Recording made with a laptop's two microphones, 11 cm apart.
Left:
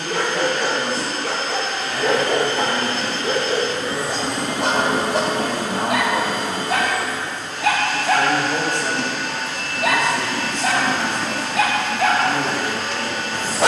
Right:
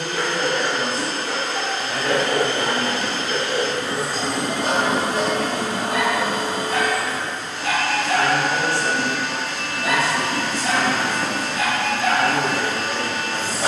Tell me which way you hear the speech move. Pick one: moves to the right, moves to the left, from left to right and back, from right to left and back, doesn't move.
from right to left and back.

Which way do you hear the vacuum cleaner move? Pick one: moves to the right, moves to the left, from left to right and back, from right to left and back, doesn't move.
doesn't move.